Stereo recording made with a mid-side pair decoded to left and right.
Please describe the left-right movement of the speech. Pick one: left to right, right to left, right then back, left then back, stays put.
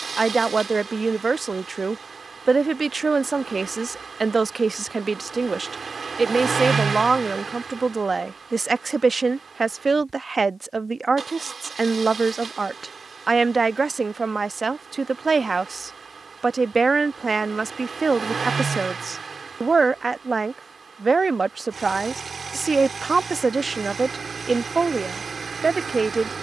stays put.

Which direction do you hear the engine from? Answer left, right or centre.
right.